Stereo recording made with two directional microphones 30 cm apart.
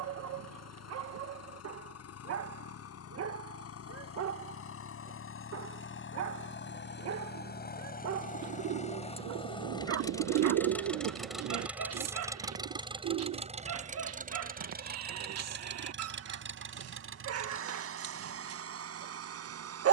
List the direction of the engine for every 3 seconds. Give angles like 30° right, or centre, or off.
60° left, 50° left, 30° left, 10° left, 20° right, 40° right, 50° right.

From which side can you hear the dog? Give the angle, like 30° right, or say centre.
60° right.